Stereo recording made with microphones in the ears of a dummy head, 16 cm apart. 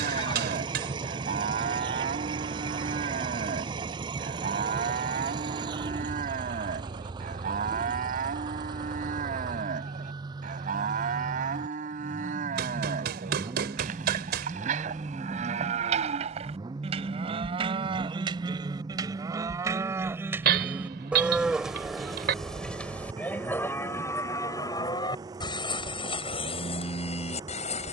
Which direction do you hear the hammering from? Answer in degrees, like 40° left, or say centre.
60° right.